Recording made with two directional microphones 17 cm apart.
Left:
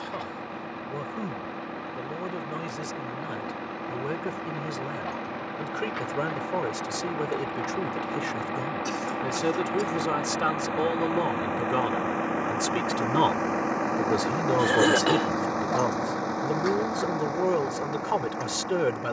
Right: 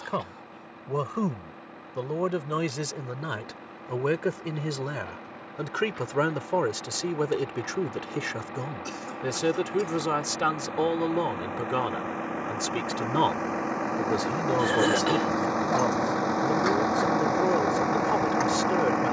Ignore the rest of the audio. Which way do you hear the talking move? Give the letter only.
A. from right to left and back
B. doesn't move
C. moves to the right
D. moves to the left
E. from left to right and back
D.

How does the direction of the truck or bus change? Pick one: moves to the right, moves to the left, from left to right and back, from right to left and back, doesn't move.
moves to the right.